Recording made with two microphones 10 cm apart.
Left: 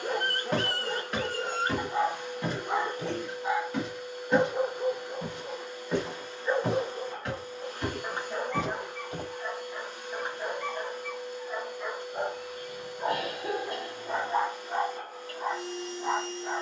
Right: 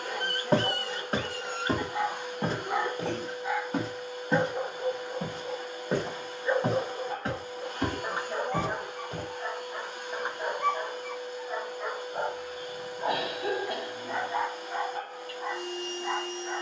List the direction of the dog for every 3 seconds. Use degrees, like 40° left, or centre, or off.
40° left, 10° left, 10° right, 20° right, 10° left, 40° left.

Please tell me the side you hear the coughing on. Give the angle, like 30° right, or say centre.
70° right.